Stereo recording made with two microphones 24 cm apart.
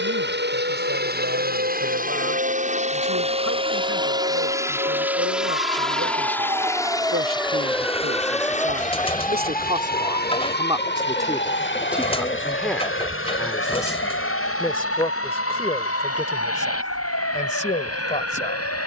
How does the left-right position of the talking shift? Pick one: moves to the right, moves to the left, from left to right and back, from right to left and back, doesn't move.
moves to the left.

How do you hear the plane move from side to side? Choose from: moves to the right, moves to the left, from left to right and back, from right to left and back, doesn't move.
moves to the left.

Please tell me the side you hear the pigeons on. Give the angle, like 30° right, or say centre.
20° left.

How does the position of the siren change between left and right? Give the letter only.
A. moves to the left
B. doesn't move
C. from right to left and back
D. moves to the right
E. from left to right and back
A.